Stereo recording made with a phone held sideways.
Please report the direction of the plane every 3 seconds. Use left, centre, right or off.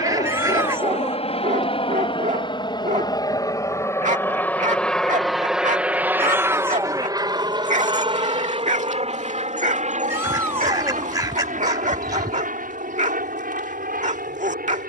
left, centre, right, right, right.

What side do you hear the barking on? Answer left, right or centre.
right.